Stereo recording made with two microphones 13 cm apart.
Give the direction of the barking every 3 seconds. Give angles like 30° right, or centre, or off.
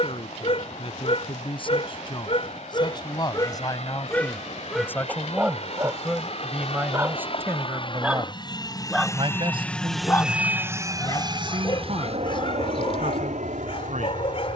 50° left, 10° left, 10° right, 20° left, 50° left.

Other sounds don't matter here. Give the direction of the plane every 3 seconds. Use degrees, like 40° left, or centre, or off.
70° left, 70° left, 50° left, 10° right, 60° right.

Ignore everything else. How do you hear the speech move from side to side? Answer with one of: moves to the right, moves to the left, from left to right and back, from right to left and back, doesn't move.
moves to the right.